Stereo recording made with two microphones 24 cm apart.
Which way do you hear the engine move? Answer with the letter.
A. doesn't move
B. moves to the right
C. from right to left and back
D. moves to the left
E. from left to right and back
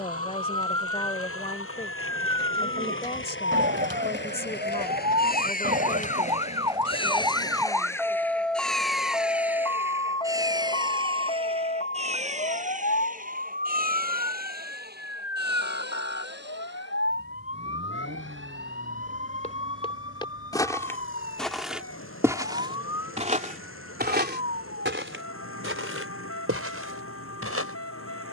B.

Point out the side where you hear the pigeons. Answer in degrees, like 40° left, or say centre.
50° right.